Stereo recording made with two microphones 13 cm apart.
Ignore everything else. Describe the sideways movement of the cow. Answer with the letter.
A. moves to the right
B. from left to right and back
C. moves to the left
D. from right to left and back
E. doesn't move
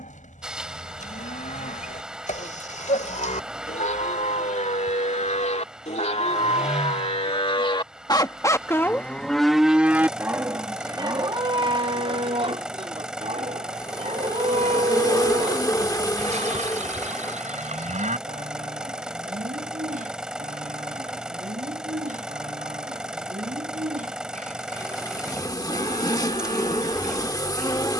A.